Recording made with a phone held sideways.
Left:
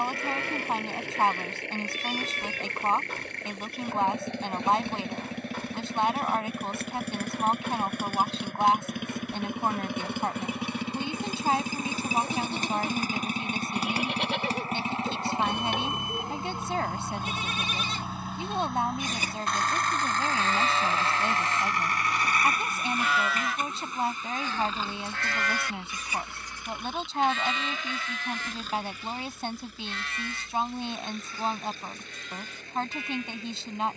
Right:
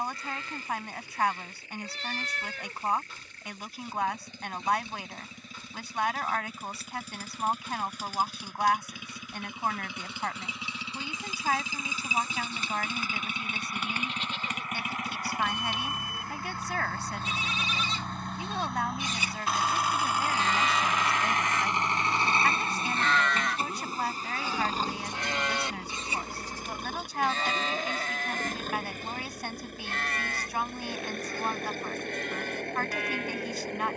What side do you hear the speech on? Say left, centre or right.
left.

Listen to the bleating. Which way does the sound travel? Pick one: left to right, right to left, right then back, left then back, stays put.
left to right.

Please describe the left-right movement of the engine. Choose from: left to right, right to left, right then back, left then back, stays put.
left to right.